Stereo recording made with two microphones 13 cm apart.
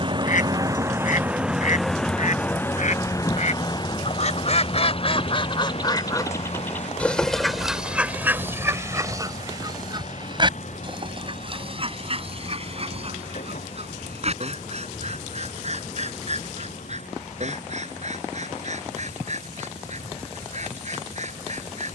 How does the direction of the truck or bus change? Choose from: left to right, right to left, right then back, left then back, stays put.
right to left.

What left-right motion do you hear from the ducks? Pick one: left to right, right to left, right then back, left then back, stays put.
left to right.